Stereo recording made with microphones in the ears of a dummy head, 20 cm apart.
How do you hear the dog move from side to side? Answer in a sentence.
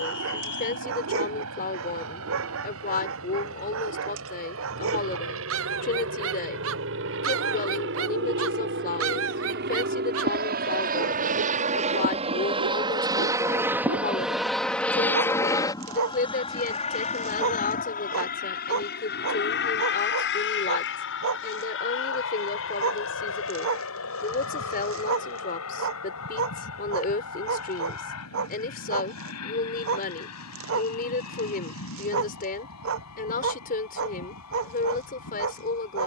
You can hear the dog stay put.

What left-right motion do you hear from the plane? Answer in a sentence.
In this clip you hear the plane go from the right side to the left.